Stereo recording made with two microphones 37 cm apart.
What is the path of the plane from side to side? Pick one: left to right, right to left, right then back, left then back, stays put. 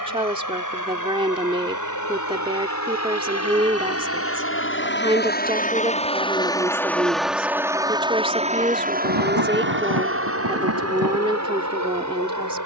left to right.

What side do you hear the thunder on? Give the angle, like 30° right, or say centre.
70° right.